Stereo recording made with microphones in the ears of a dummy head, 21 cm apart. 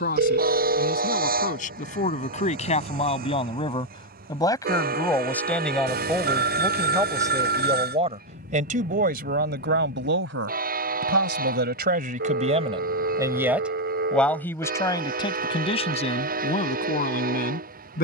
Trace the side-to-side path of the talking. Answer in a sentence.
In this clip you hear the talking go right and come back.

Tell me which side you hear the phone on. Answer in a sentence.
You can hear the phone on the right.